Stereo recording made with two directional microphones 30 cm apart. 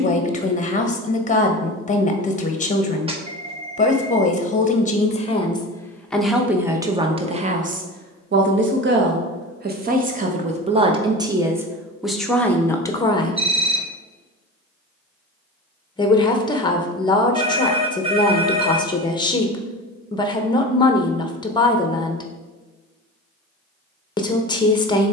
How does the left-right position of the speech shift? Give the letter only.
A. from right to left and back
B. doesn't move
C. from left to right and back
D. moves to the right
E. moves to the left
C.